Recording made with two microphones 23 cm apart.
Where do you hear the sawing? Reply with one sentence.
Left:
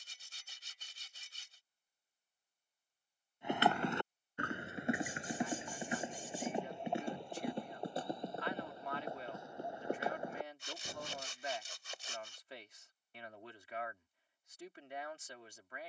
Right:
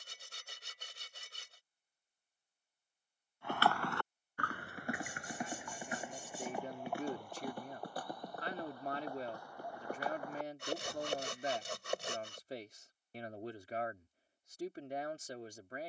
In this clip you hear the sawing on the right.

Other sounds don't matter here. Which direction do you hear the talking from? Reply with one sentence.
You can hear the talking on the right.